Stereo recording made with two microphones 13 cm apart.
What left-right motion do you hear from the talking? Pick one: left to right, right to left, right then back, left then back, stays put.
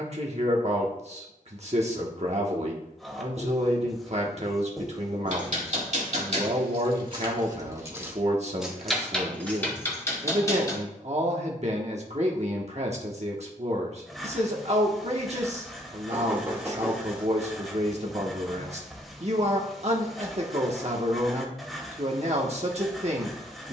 stays put.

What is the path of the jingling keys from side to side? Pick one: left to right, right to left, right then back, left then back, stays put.
right to left.